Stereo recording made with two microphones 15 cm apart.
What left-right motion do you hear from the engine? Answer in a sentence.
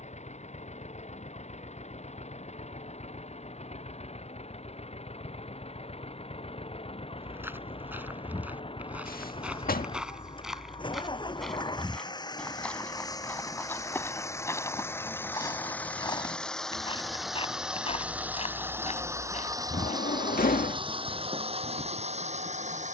In this clip you hear the engine go from the left side to the right.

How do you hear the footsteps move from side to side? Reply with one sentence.
You can hear the footsteps go from the right side to the left.